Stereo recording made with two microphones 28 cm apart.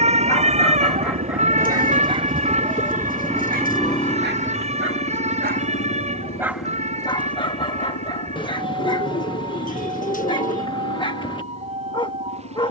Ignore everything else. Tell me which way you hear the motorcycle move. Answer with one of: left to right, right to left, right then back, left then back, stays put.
right to left.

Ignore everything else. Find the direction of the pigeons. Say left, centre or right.
left.